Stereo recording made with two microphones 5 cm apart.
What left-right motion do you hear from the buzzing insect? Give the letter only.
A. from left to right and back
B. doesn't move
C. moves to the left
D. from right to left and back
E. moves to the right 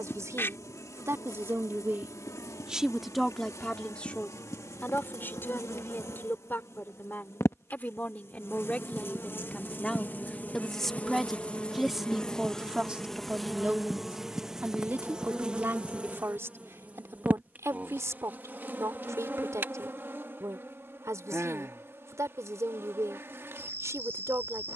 E.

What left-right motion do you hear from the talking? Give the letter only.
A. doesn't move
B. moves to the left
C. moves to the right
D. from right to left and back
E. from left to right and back
D.